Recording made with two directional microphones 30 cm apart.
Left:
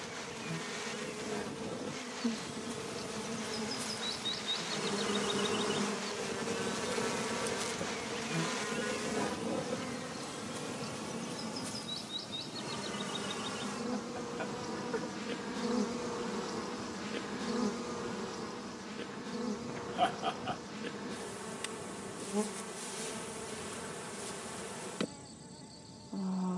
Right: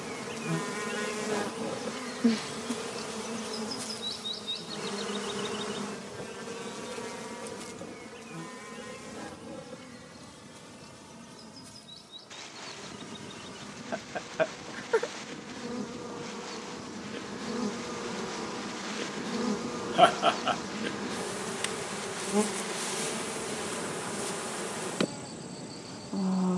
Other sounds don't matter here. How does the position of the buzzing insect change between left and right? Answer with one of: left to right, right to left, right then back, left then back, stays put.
left then back.